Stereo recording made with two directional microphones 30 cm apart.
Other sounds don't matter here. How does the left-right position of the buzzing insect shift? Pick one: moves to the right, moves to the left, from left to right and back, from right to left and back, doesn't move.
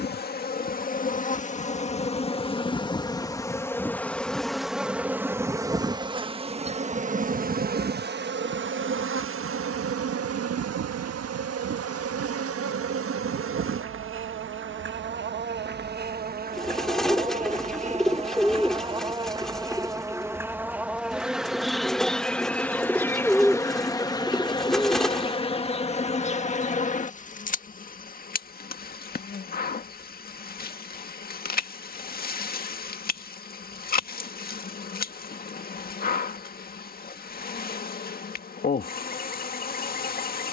from left to right and back.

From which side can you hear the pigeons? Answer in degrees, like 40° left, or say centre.
centre.